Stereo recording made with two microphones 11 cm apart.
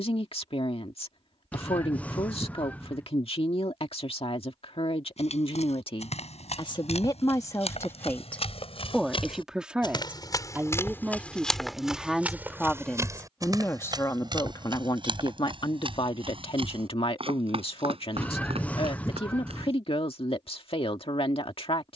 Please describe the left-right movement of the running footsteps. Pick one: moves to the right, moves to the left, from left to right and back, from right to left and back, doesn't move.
moves to the right.